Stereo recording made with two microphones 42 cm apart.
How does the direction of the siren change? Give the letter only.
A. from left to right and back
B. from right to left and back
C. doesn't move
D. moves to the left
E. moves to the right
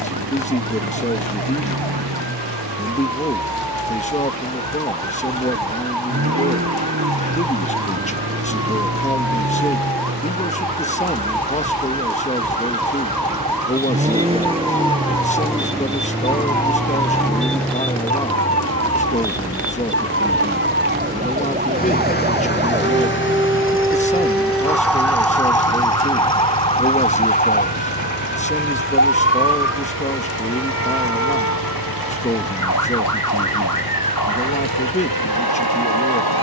D.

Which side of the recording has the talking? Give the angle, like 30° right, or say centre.
20° left.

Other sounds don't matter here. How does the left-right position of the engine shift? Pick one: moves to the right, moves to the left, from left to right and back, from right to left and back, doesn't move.
moves to the left.